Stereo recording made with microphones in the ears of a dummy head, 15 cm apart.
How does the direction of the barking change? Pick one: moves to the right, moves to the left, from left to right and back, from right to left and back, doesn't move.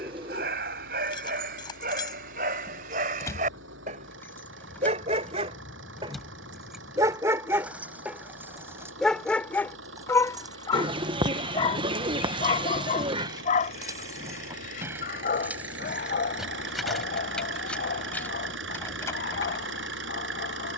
moves to the left.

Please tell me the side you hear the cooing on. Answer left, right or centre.
right.